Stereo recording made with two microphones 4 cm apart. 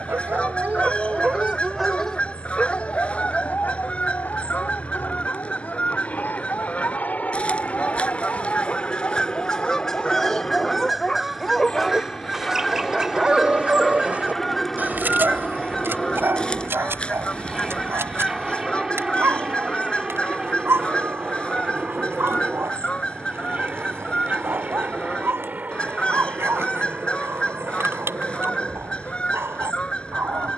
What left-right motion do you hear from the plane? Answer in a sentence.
In this clip you hear the plane travel towards the right.